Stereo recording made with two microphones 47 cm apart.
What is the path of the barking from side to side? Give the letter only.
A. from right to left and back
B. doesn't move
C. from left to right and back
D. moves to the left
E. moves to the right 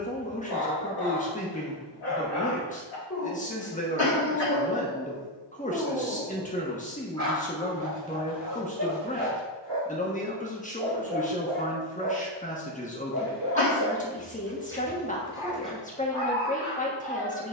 C.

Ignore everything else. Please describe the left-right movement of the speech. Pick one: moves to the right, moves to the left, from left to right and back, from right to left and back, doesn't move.
doesn't move.